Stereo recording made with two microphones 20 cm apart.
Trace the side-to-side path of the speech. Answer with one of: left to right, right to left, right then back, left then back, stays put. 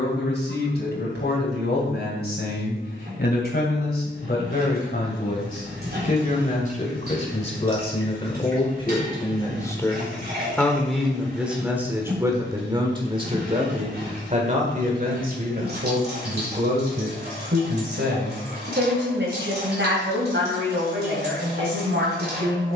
left to right.